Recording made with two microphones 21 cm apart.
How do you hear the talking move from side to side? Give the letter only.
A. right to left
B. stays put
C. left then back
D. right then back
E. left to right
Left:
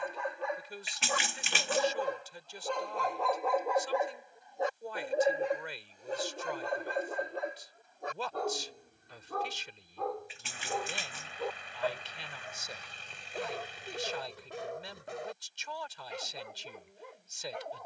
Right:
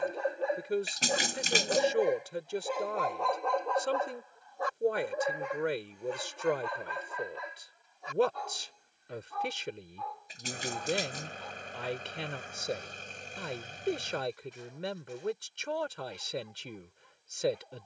B.